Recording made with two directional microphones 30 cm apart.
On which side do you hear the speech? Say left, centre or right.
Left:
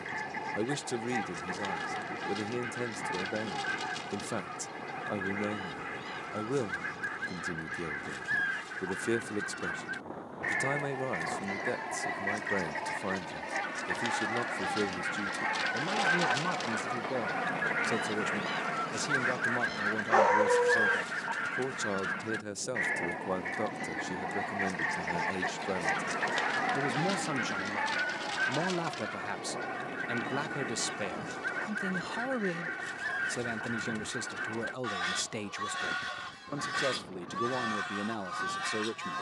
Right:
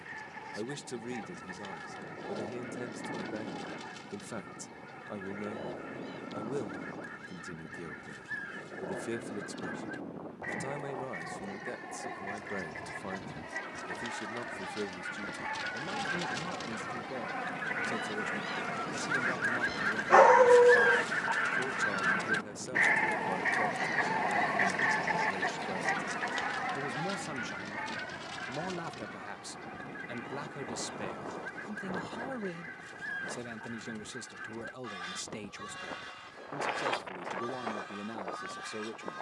left.